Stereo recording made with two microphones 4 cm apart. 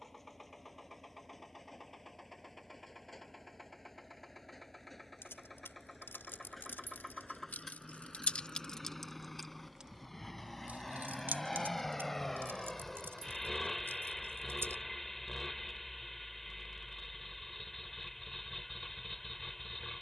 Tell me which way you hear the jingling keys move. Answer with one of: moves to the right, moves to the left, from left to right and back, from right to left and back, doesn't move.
moves to the right.